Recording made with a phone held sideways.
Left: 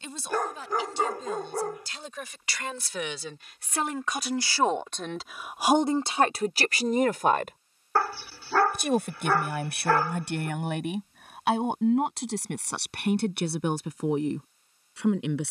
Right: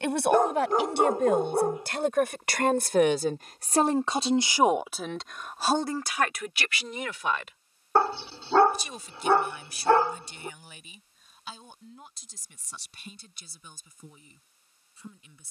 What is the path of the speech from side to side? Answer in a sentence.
In this clip you hear the speech move to the left.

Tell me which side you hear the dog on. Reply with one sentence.
In this clip you hear the dog on the right.